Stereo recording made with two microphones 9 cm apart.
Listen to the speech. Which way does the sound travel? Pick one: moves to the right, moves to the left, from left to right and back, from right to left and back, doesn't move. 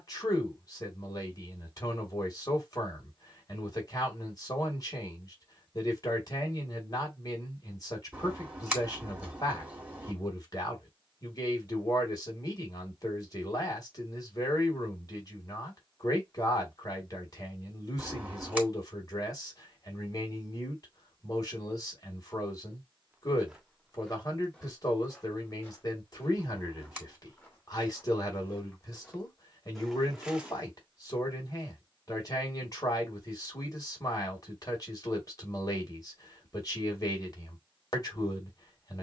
doesn't move.